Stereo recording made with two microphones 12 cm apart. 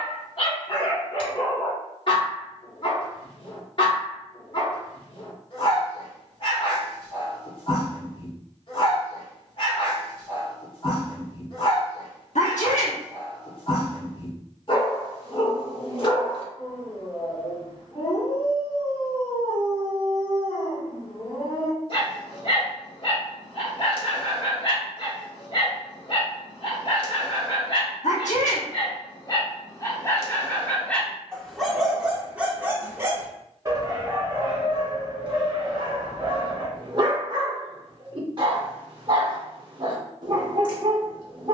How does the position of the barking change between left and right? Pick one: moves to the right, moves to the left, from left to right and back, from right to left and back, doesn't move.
moves to the right.